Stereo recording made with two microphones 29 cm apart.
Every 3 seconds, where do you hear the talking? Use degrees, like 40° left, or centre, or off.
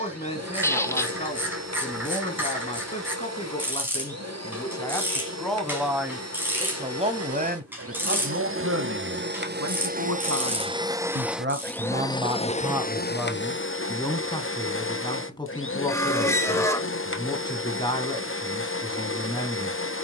20° left, 10° left, 30° right, 50° right, centre, 20° left, 20° left.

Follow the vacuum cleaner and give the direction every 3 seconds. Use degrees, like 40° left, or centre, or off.
60° right, 60° right, 50° right, 20° right, 40° left, 50° left, 50° left.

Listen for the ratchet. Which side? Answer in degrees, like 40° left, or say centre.
10° right.